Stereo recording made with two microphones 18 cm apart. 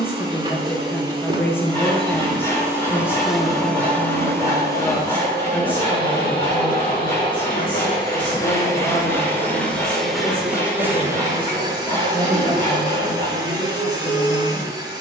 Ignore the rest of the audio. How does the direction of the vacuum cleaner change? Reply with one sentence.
In this clip you hear the vacuum cleaner move from right to left and back again.